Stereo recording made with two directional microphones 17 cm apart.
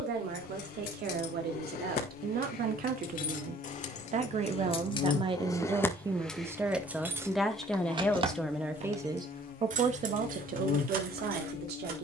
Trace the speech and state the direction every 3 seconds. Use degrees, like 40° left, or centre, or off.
60° right, 40° right, centre, 50° right.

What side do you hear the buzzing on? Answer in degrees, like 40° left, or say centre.
50° left.